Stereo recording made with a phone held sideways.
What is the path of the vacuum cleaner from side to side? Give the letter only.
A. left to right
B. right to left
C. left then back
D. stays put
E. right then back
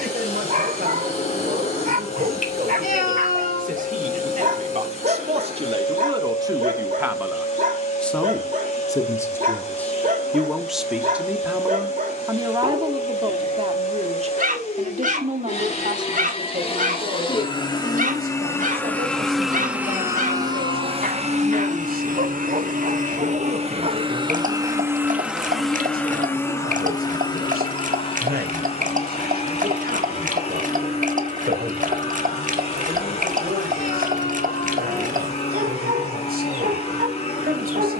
E.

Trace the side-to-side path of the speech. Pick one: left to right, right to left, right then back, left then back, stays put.
left then back.